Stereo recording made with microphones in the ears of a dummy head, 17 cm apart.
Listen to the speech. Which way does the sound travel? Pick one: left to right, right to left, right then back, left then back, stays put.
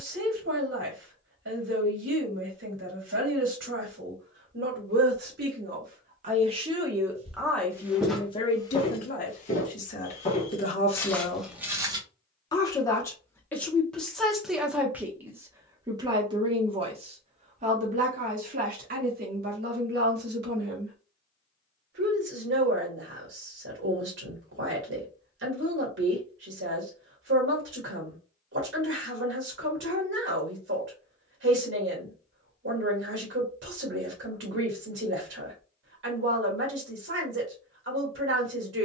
left then back.